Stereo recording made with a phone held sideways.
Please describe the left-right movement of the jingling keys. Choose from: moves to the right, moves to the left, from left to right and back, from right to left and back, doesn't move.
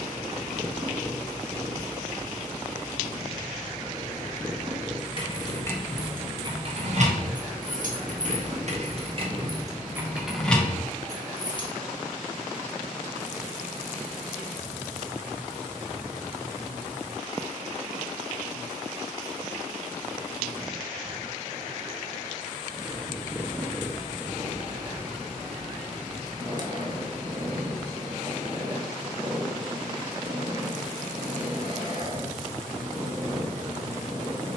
from left to right and back.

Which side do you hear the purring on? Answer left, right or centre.
right.